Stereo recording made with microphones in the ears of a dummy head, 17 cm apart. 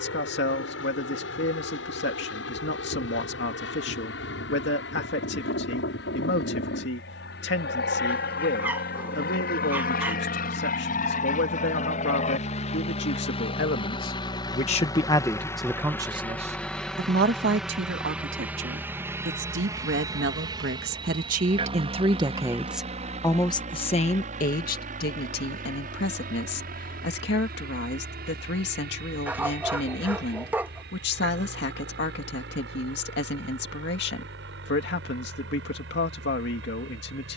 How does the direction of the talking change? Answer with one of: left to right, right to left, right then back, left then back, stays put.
right then back.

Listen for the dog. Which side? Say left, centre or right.
centre.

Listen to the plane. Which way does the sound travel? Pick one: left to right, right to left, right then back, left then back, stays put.
left to right.